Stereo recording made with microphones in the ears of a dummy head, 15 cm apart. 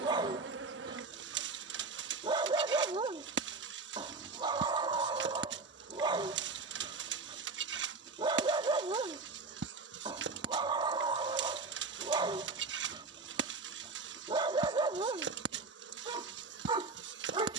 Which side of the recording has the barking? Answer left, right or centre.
right.